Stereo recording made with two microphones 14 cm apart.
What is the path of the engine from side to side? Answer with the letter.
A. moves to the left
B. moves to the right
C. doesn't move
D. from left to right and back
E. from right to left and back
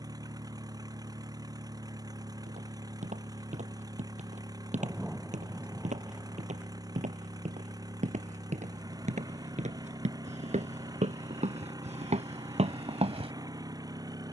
C.